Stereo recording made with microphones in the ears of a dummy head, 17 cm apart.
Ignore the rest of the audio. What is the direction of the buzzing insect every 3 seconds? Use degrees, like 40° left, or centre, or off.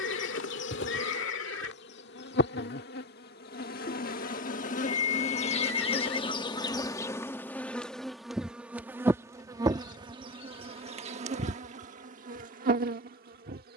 60° left, 40° left, 10° left, 30° right, 50° right.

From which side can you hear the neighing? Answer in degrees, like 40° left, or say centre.
70° left.